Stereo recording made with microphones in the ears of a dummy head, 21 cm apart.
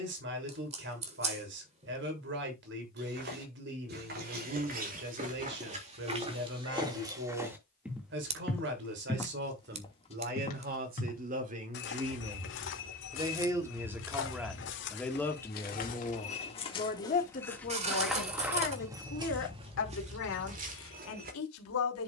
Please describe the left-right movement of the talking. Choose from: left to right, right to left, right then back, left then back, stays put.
right to left.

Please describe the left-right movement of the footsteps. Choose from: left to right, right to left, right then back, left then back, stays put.
left then back.